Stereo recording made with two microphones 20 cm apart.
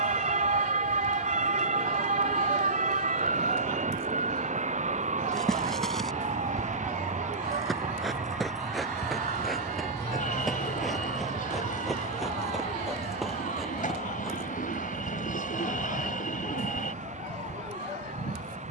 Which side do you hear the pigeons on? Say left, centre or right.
left.